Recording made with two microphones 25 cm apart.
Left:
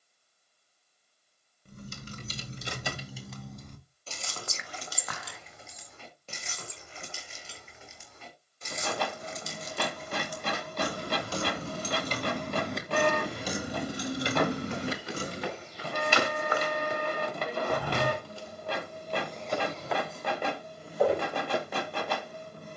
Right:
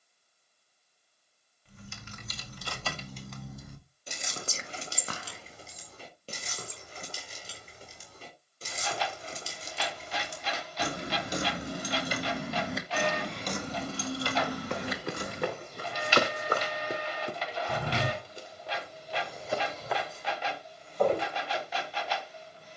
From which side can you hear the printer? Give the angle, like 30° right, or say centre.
60° left.